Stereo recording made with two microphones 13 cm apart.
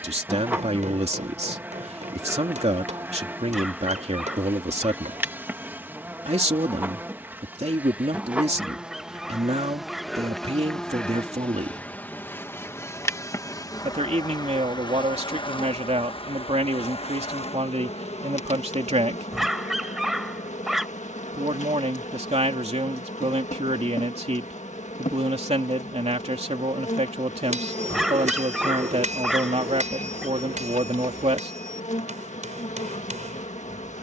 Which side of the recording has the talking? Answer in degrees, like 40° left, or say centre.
50° right.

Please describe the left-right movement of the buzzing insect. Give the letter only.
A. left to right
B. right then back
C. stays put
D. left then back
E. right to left
E.